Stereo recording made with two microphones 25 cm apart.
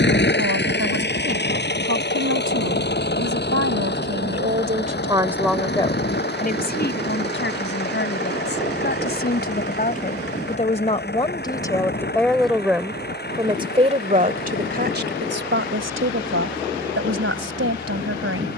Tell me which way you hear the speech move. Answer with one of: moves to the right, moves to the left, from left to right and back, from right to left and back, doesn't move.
from right to left and back.